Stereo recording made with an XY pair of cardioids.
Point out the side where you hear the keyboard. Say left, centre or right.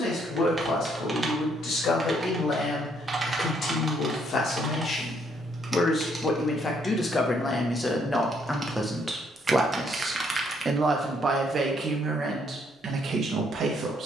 right.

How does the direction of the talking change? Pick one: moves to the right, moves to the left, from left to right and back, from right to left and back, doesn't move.
moves to the right.